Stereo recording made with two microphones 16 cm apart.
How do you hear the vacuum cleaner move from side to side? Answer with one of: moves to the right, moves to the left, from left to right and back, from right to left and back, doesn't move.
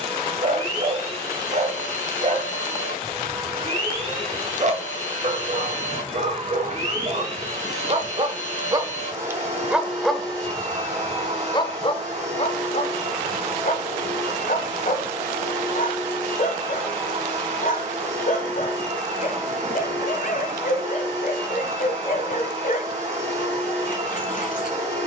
doesn't move.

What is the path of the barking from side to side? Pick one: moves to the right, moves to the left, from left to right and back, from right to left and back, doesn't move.
moves to the left.